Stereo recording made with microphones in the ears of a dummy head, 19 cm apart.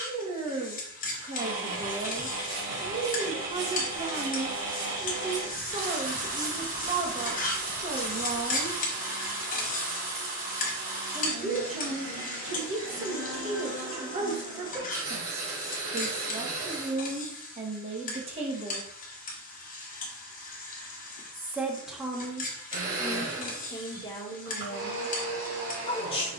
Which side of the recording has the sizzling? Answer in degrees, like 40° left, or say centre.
40° left.